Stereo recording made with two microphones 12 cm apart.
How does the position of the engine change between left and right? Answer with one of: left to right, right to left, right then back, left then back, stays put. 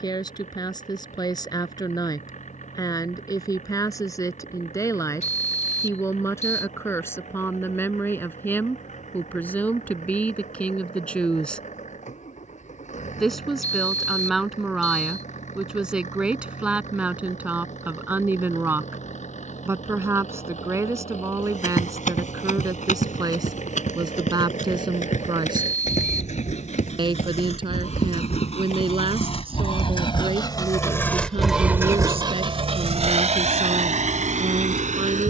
left to right.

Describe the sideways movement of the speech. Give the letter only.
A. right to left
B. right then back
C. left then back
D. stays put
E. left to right
E.